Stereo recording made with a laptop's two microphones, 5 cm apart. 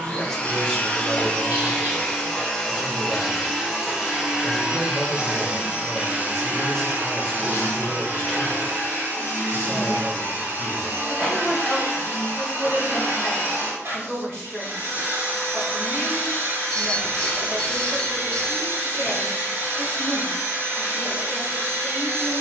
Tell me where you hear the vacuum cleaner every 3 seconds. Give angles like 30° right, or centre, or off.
20° left, 10° right, 50° right, 60° right, 60° right, 60° right, 60° right, 60° right.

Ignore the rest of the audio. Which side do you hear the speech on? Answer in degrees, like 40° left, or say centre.
10° left.